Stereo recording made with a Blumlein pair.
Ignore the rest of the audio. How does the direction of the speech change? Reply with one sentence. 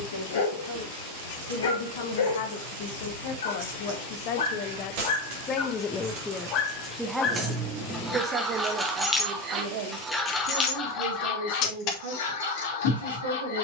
You can hear the speech go from the left side to the right.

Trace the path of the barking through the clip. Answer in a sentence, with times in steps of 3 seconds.
You can hear the barking on the left from 0 s, in the centre from 6 s and on the left from 12 s.